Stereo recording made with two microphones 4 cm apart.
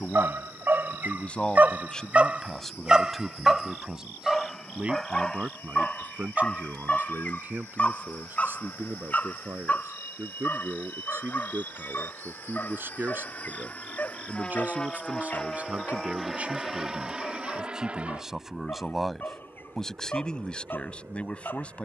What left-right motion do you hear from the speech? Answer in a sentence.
You can hear the speech move from left to right and back again.